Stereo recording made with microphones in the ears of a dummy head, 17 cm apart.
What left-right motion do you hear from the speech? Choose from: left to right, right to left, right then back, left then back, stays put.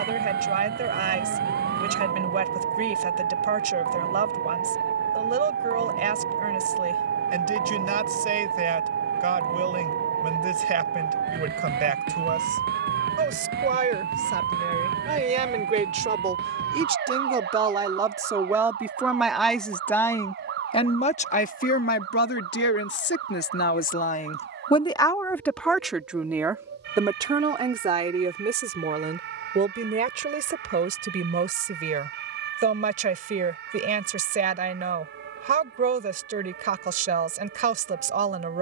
left then back.